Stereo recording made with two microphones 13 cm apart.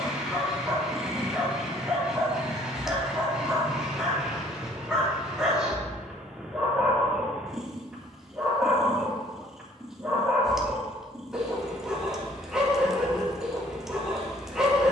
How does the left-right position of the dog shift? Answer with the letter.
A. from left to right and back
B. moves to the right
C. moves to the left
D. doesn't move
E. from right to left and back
D.